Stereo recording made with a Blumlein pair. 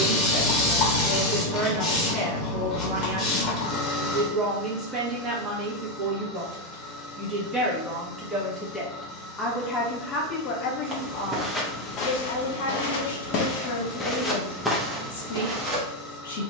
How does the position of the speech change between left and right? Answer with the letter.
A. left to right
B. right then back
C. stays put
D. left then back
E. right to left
E.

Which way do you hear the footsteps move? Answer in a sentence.
You can hear the footsteps move from right to left and back again.